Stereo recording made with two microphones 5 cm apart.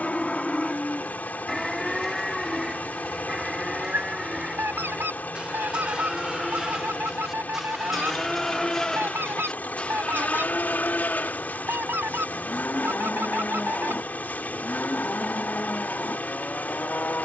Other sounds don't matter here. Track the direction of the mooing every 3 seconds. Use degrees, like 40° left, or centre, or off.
centre, 20° right, 10° right, 30° left, 40° left, 40° left.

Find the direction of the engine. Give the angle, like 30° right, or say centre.
30° left.